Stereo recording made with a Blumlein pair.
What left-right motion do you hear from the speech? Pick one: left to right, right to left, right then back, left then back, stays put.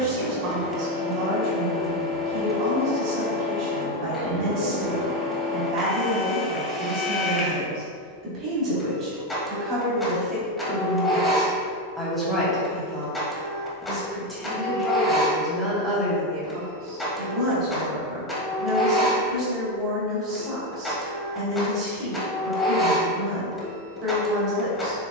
left then back.